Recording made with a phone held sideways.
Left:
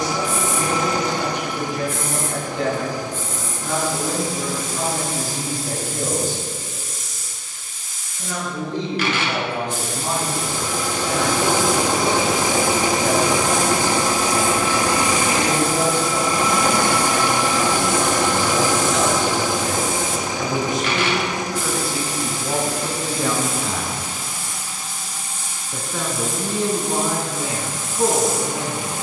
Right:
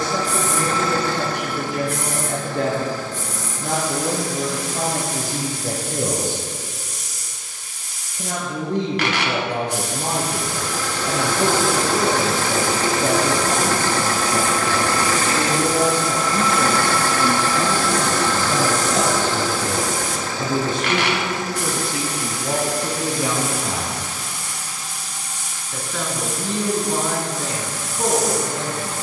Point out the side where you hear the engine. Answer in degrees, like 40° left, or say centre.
20° left.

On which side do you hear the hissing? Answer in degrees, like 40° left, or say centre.
70° right.